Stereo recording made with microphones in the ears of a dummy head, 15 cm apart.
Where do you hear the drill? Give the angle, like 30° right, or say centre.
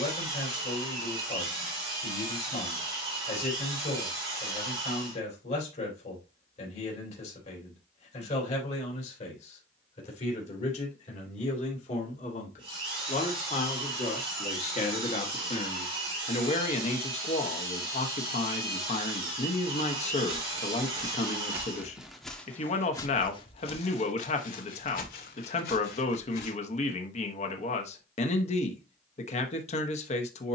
30° right.